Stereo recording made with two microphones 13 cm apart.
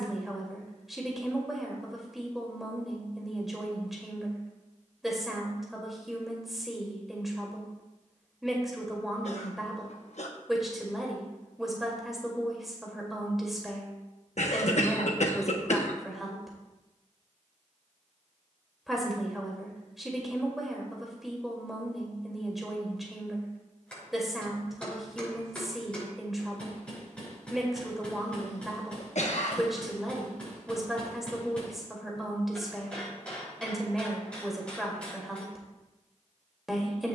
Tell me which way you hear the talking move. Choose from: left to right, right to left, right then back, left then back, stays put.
stays put.